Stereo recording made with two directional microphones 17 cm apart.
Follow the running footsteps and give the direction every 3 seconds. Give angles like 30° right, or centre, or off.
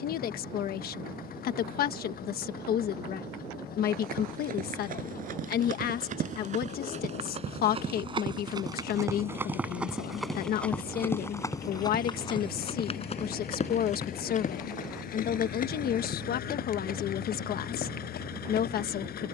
off, 60° right, 40° right, centre, 40° left, 60° left, 60° left.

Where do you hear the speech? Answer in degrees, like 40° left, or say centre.
60° left.